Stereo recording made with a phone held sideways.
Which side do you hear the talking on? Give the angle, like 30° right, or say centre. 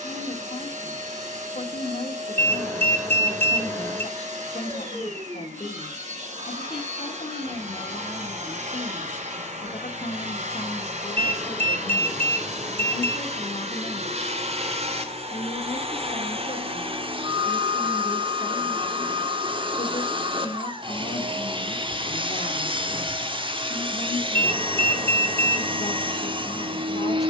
50° left.